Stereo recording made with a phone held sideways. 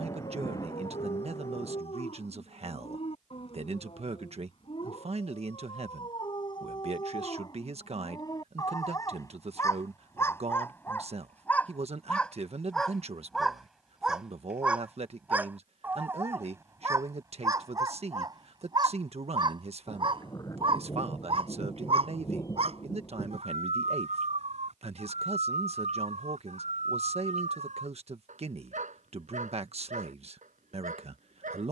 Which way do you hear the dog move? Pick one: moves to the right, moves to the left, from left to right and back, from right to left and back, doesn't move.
moves to the right.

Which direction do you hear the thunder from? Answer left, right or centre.
left.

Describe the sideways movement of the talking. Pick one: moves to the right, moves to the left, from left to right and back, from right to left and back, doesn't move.
doesn't move.